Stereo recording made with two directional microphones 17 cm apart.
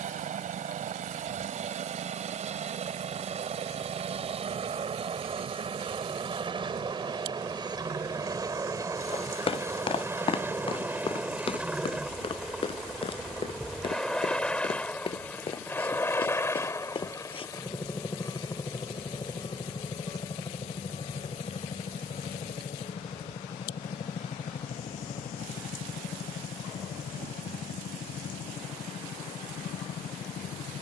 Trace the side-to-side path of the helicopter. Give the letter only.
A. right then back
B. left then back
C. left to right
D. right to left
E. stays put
D.